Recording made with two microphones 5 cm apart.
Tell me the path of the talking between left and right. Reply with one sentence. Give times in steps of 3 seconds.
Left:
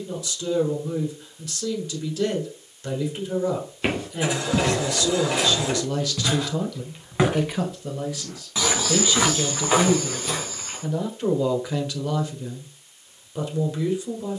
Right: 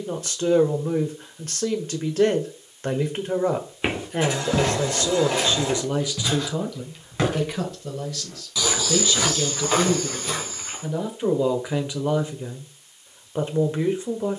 You can hear the talking on the right from 0 s, in the centre from 6 s and on the right from 12 s.